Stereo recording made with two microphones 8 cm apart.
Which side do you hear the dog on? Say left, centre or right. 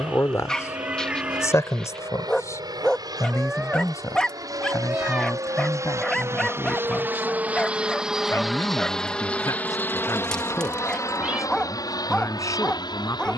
centre.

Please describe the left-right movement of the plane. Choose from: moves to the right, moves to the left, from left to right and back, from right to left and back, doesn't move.
moves to the left.